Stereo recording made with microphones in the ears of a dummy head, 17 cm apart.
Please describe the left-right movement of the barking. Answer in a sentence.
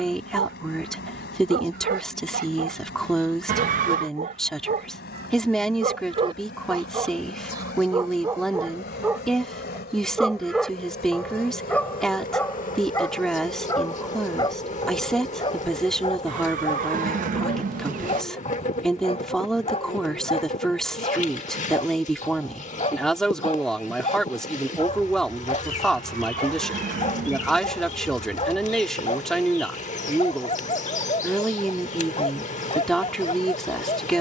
In this clip you hear the barking go from the right side to the left.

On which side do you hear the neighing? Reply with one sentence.
You can hear the neighing on the right.